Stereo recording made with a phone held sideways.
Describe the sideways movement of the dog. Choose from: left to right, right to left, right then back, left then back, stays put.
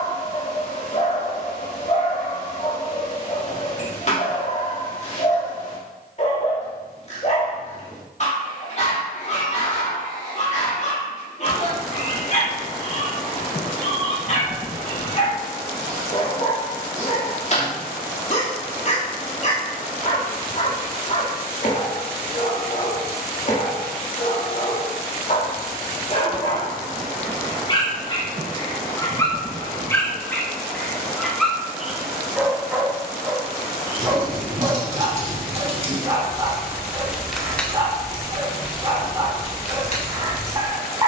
left to right.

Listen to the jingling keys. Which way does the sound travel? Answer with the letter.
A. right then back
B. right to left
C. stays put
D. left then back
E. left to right
B.